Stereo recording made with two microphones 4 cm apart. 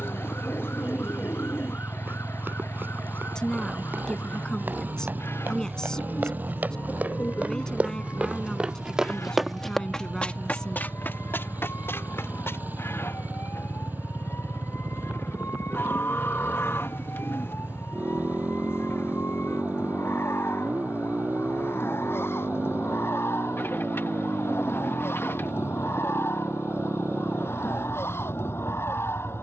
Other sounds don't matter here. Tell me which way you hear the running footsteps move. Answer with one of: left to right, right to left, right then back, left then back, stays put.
right to left.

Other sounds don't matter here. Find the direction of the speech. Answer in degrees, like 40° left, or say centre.
20° left.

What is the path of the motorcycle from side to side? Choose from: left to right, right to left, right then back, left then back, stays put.
stays put.